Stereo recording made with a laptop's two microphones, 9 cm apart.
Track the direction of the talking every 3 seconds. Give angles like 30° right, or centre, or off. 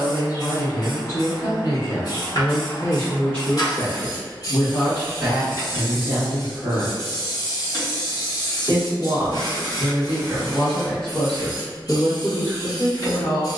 40° left, 10° left, 20° right, centre, 40° left.